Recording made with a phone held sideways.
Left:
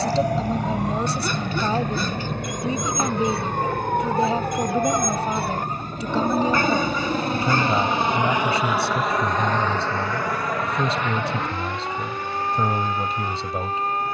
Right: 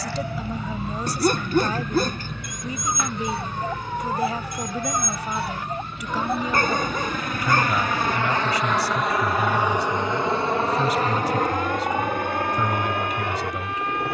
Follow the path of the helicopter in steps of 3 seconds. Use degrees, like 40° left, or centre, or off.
70° left, 60° left, 30° left, 30° right, 60° right.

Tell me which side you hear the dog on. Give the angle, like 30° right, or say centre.
40° right.